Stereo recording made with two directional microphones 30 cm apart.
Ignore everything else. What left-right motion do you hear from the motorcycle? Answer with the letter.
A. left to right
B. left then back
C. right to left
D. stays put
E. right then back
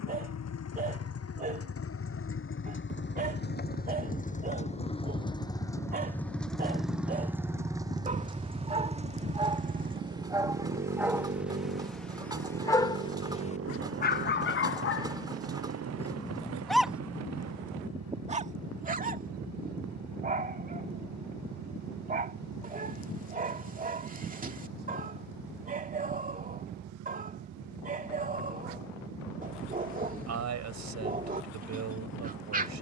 A.